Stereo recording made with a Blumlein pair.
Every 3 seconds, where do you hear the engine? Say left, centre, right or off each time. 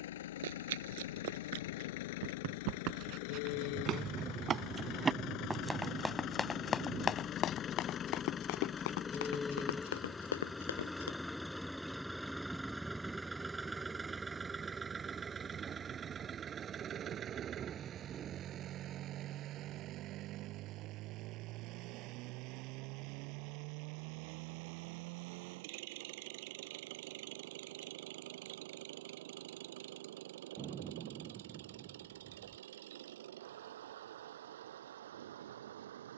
left, left, left, centre, centre, right, right, right, right, right, right, right.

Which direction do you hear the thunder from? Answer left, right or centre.
right.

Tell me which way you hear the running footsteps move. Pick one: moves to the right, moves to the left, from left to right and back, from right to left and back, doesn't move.
moves to the left.